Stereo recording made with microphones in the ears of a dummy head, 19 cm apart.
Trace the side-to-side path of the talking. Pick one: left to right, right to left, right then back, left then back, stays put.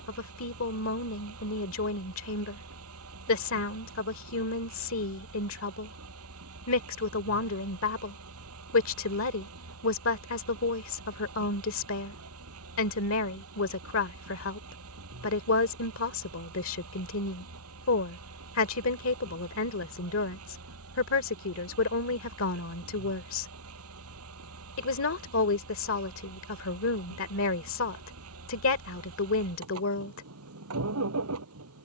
stays put.